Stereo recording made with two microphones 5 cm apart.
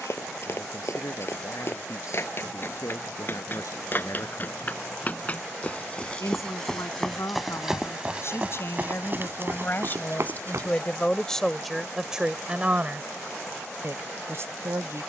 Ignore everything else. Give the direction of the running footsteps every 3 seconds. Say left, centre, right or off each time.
left, left, centre, right, off.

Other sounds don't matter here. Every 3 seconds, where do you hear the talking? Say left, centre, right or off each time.
left, left, left, left, right.